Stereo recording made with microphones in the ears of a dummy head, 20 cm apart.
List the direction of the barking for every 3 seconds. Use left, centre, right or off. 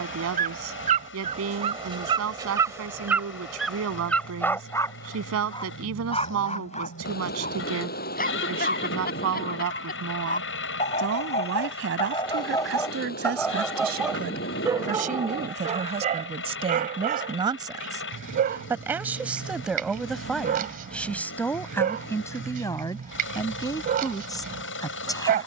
right, centre, left, left, centre, right, right, right, right.